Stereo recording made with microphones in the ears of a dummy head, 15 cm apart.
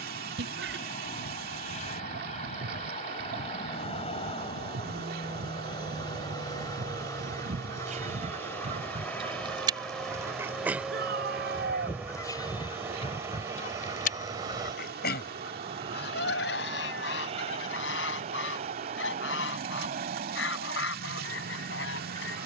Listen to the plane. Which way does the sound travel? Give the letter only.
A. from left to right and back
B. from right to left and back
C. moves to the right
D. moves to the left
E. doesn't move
C.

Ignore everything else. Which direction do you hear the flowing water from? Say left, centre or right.
right.